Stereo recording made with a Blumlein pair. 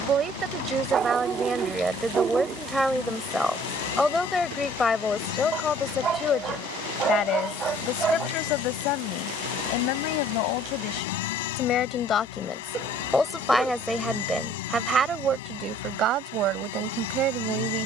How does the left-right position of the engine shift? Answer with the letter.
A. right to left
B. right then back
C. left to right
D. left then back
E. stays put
E.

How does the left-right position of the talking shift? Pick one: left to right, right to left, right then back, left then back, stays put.
left then back.